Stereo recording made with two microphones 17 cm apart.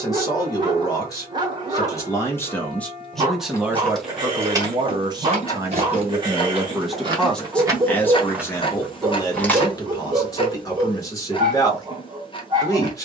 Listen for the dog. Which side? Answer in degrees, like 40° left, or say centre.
30° right.